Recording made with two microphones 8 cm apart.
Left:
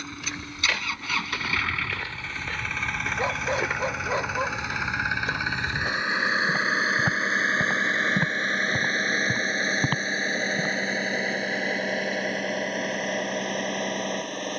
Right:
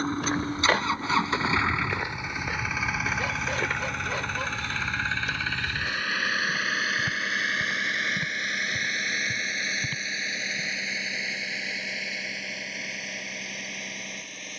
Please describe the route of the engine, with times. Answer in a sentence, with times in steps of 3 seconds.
You can hear the engine on the right from 0 s, in the centre from 3 s and on the left from 6 s.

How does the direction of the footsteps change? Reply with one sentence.
You can hear the footsteps move to the left.